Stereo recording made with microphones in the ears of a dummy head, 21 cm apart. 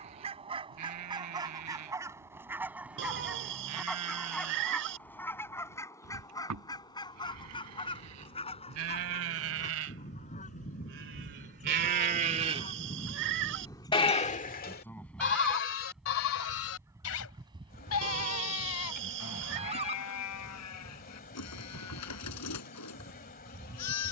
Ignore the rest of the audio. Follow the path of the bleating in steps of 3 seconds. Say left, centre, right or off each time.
right, right, right, right, centre, left, left, left.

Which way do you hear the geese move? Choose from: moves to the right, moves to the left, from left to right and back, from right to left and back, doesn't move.
from right to left and back.